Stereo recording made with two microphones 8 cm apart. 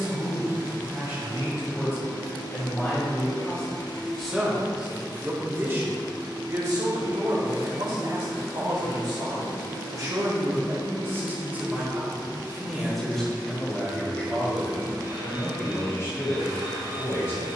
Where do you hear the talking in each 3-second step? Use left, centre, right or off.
left, centre, right, right, centre, left.